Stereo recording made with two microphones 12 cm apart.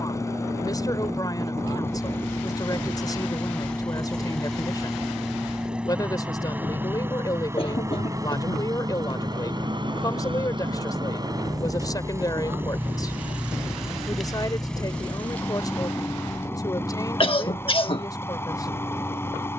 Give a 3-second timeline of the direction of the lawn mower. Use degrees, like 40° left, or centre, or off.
20° left, centre, 20° right, 40° right, 10° right, 20° left, 20° left.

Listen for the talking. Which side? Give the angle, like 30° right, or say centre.
30° left.